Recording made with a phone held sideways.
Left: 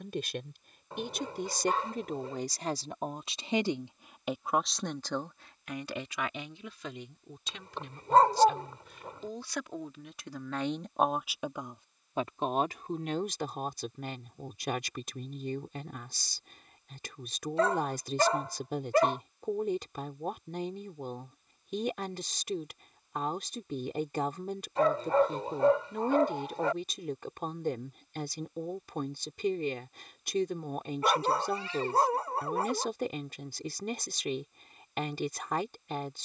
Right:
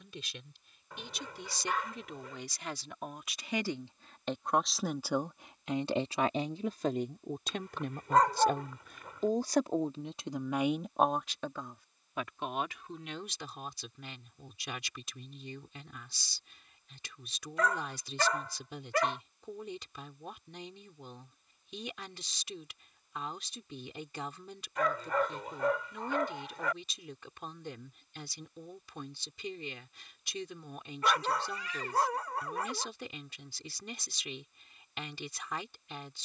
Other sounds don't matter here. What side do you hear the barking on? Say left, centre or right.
left.